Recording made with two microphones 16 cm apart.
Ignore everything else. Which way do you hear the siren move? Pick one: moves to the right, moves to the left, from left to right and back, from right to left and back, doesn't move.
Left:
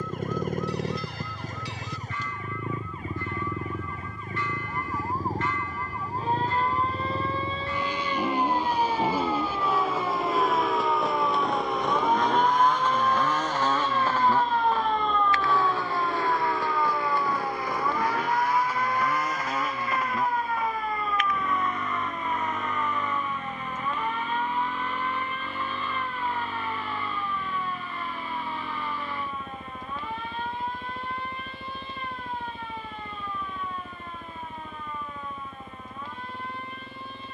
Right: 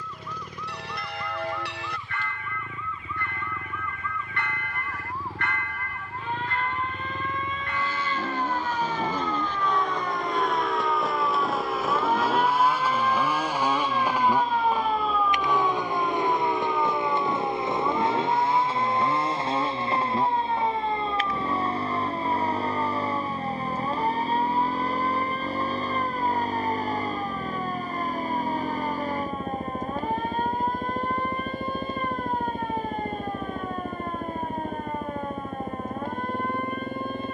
moves to the right.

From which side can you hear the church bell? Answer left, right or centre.
right.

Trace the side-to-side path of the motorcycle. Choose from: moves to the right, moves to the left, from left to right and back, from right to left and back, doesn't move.
moves to the right.